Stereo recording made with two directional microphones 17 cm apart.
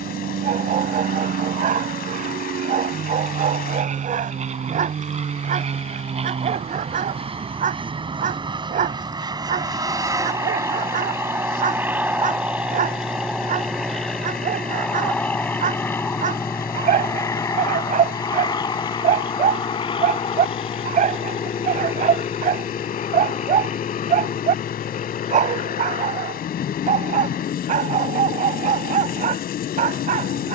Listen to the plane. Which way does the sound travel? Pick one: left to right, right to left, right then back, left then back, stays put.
right to left.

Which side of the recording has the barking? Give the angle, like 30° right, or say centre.
50° right.